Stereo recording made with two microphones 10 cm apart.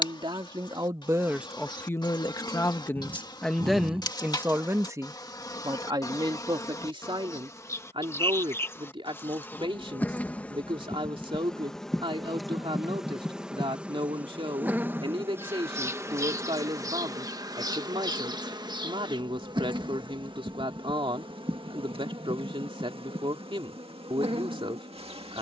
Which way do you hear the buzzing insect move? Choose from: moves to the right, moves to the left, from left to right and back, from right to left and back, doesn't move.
moves to the right.